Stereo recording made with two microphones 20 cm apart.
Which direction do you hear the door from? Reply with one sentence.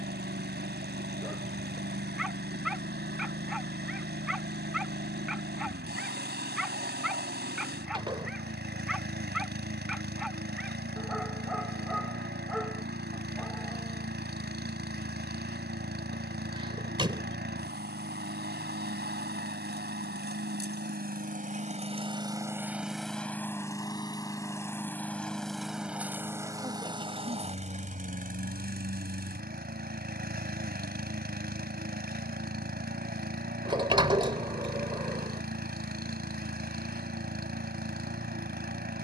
In this clip you hear the door on the right.